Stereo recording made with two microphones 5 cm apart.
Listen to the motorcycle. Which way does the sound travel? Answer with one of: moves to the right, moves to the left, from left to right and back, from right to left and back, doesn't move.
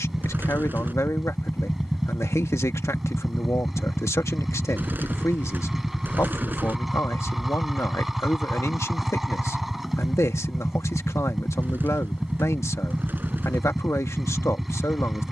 doesn't move.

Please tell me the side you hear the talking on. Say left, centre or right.
left.